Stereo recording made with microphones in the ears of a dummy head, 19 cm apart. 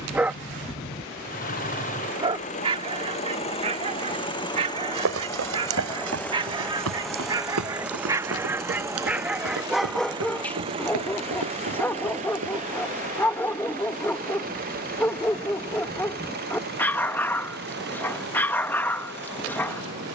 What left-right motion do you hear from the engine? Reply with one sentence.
You can hear the engine move from left to right.